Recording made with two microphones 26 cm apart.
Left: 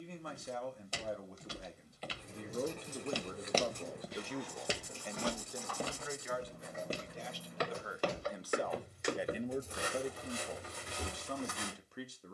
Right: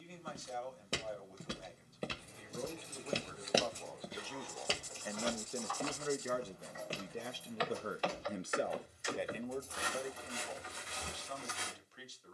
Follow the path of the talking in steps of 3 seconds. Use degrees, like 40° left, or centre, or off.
60° left, 10° left, 40° right, 40° left.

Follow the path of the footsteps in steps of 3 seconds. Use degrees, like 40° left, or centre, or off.
60° right, 10° left, 50° left, 60° left.